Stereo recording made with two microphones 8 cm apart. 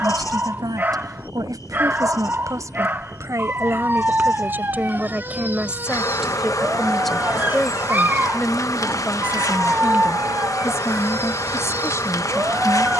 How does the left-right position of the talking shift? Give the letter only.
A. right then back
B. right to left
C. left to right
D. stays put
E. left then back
B.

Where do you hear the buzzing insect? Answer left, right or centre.
left.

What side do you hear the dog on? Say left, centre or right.
right.